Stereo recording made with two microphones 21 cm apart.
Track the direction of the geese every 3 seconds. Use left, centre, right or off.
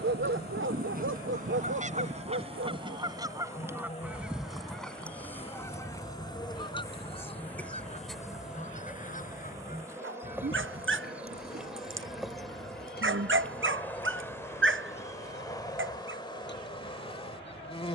right, centre, left, left, left, left.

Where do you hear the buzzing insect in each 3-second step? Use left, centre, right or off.
left, left, centre, centre, centre, left.